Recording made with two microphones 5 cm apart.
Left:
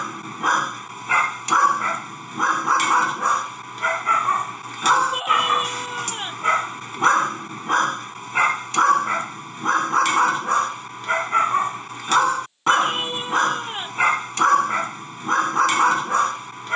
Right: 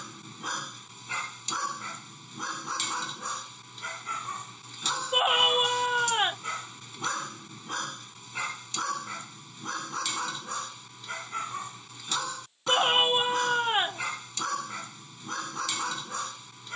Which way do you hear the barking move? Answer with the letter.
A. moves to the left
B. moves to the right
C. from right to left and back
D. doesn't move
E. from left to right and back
D.